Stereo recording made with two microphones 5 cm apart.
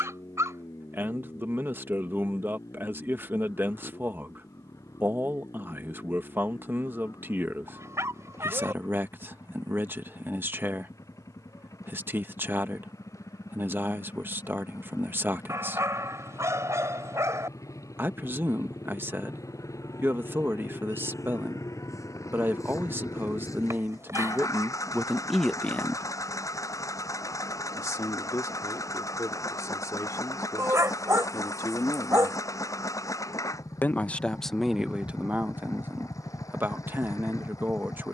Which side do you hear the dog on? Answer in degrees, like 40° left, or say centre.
70° right.